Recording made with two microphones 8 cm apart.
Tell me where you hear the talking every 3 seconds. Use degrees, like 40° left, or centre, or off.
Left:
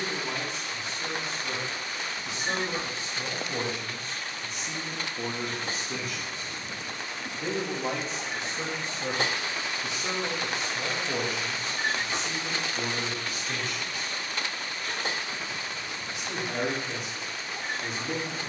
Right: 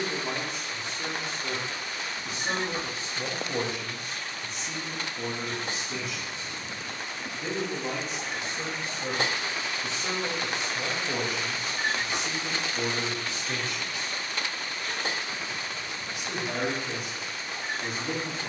50° right, centre, 40° left, centre, 30° right, 50° right.